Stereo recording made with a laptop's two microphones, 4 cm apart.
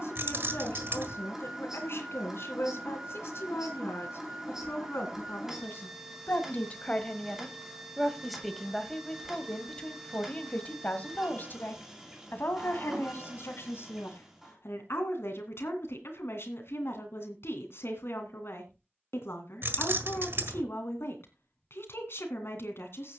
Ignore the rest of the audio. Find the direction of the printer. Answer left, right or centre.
centre.